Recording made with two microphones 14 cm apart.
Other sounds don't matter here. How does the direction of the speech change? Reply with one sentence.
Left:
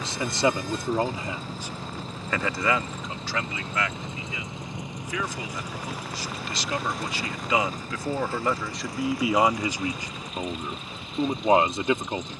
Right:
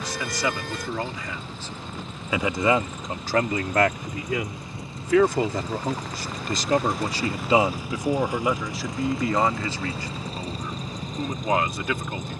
In this clip you hear the speech go right and come back.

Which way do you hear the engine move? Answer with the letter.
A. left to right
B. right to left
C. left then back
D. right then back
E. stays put
A.